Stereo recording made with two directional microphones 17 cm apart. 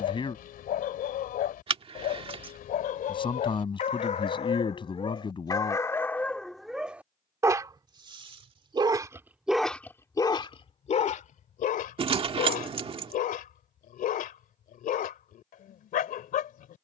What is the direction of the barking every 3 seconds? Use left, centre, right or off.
left, left, centre, left, left, left.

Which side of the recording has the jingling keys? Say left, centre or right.
right.